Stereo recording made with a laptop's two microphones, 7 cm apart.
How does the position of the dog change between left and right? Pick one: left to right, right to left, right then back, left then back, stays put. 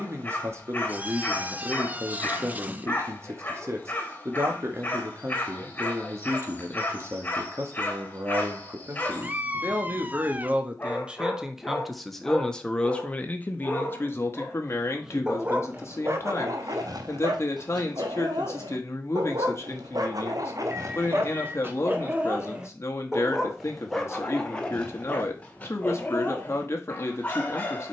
right then back.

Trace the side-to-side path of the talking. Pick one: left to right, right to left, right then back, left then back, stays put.
right to left.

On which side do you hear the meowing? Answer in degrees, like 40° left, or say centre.
20° right.